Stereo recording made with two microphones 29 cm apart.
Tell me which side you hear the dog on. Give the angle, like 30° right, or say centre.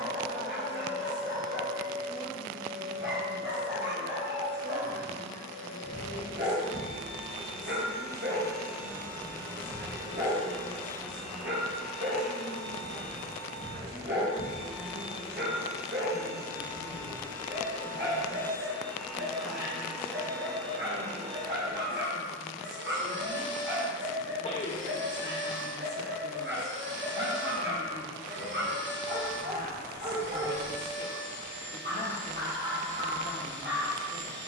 40° right.